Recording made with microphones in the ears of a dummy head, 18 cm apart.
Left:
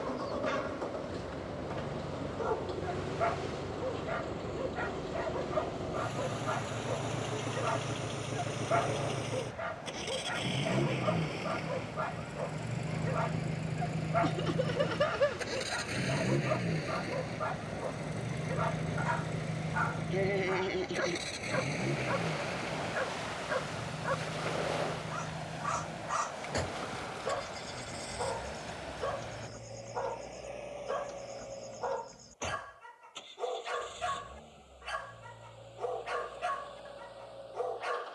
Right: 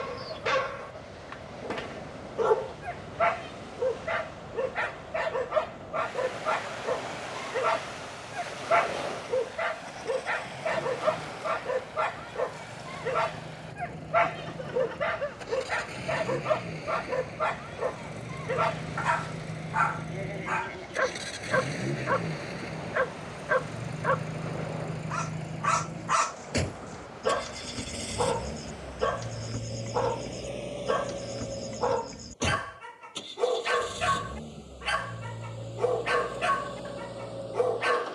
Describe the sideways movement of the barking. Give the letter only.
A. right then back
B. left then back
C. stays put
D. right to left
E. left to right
C.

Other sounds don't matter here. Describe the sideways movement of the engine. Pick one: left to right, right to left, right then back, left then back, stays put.
left to right.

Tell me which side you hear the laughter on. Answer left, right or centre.
left.